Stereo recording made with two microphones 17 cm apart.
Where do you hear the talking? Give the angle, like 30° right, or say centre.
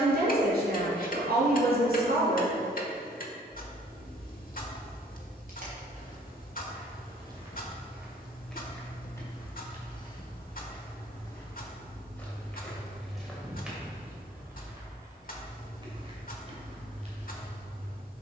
70° right.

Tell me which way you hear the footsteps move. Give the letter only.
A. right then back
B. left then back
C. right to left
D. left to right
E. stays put
B.